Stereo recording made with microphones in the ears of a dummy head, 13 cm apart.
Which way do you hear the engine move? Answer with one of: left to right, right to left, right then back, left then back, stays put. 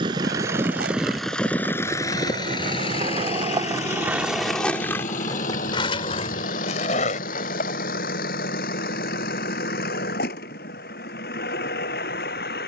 right to left.